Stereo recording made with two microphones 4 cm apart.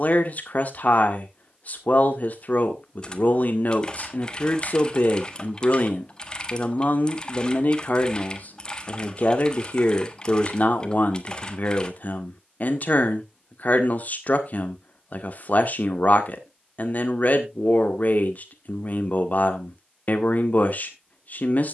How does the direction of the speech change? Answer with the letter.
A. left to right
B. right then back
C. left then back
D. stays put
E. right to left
D.